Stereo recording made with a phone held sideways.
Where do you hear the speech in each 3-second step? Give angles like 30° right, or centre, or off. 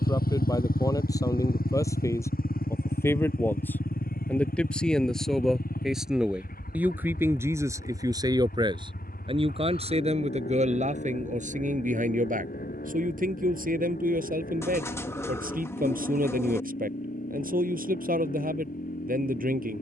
20° left, 10° left, 20° right, 50° right, 80° right, 80° right, 80° right.